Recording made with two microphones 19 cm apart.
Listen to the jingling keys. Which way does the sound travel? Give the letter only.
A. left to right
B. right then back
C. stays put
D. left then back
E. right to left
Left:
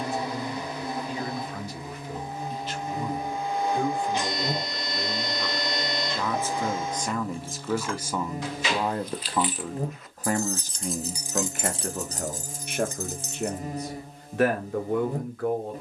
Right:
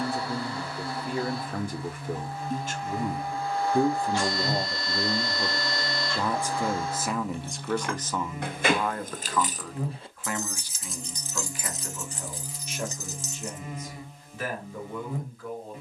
E.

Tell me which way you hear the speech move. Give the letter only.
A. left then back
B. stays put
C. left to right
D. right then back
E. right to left
E.